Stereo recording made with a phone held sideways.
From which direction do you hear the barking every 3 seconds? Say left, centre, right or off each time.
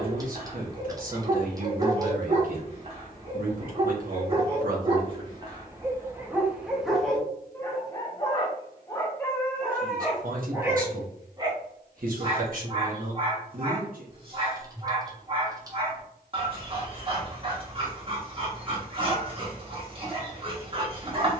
right, right, centre, centre, right, right, right.